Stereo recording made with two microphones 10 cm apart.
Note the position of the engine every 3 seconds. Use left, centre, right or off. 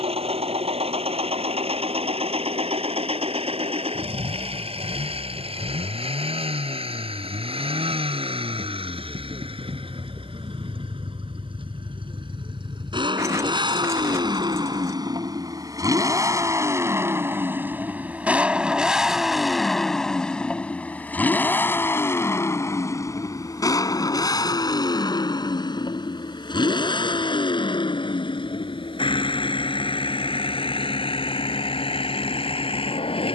right, right, right, right, right, right, centre, left, left, left, left.